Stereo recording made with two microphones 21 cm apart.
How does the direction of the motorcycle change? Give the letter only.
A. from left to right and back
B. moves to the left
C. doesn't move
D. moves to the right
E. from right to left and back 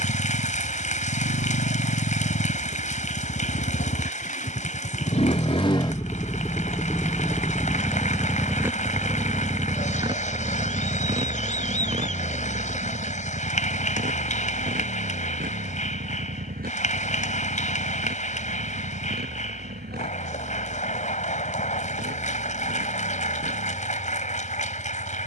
D.